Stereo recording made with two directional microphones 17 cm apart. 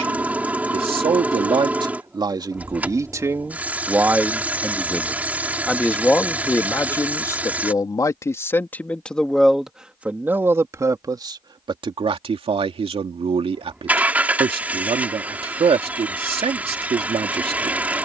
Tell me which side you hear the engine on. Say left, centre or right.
centre.